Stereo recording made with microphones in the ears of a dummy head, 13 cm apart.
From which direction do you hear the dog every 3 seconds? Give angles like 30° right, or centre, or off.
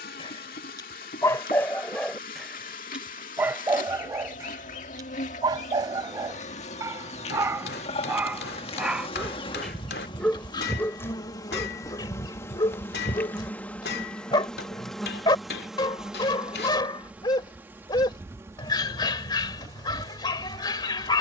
20° left, 20° right, 20° right, 10° left, 30° left, 30° left, 30° left.